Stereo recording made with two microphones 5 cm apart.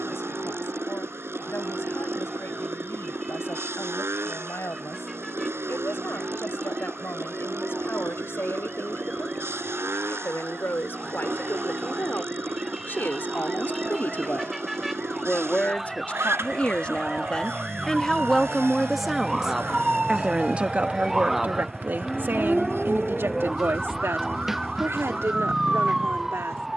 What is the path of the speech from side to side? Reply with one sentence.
You can hear the speech move from left to right.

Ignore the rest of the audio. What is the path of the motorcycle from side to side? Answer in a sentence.
In this clip you hear the motorcycle stay put.